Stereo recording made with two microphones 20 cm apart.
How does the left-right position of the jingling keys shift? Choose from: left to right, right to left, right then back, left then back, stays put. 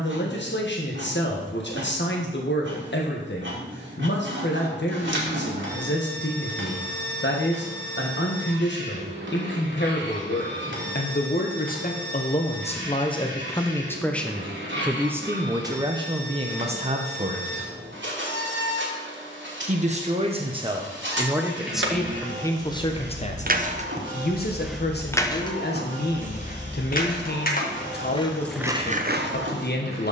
left then back.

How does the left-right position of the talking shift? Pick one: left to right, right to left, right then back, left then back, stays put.
right then back.